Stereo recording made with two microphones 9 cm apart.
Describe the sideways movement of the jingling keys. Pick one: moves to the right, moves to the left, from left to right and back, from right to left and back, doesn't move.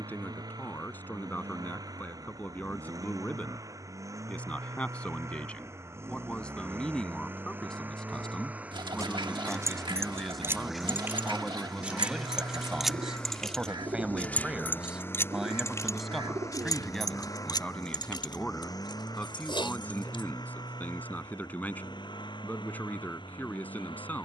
moves to the left.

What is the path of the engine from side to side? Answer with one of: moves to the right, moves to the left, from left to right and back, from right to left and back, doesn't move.
moves to the left.